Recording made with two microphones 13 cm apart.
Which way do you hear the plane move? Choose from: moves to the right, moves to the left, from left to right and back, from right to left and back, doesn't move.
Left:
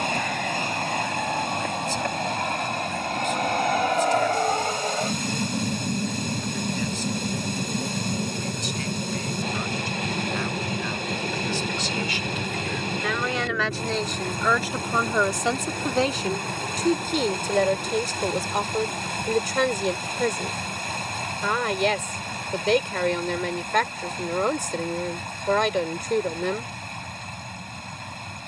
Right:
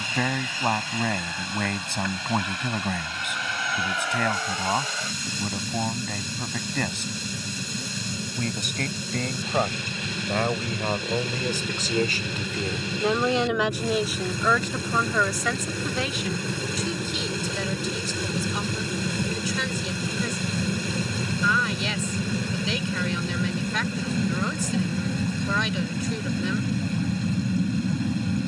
moves to the right.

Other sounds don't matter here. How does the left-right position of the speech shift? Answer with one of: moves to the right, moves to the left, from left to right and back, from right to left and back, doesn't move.
moves to the left.